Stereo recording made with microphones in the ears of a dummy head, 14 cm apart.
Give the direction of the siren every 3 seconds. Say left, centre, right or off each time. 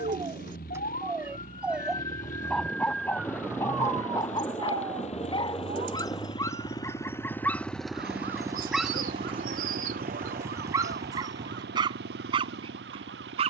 left, right, right, right, right.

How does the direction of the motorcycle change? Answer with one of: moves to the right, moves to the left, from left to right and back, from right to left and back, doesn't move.
moves to the right.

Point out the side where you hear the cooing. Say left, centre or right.
right.